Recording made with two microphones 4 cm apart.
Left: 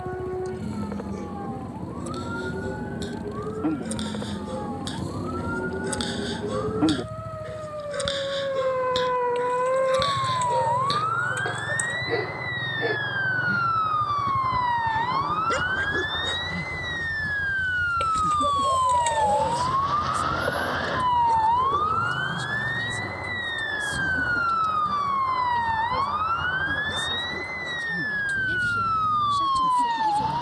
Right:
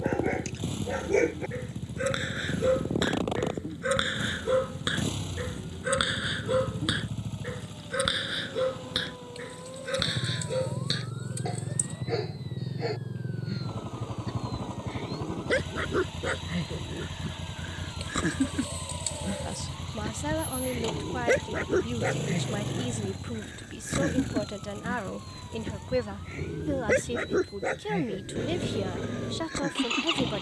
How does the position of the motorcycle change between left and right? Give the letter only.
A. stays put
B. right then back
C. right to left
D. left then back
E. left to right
A.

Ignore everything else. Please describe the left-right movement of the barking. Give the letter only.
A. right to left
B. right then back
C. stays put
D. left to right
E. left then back
E.